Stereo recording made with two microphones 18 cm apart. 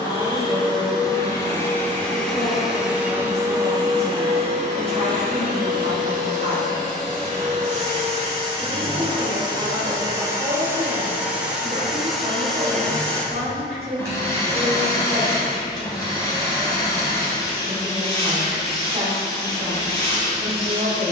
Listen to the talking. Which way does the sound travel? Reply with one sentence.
You can hear the talking stay put.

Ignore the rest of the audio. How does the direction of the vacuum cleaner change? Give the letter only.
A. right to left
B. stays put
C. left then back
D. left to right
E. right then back
E.